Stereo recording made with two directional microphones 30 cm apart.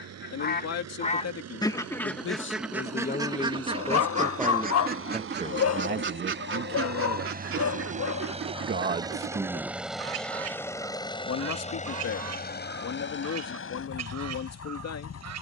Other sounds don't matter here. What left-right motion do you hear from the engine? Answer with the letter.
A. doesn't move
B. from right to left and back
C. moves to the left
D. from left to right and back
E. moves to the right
C.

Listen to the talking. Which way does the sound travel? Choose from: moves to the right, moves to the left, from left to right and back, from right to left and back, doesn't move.
from left to right and back.